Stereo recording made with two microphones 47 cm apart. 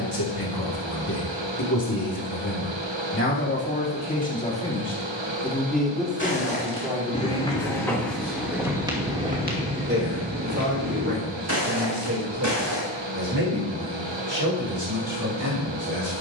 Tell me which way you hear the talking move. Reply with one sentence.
In this clip you hear the talking move from left to right.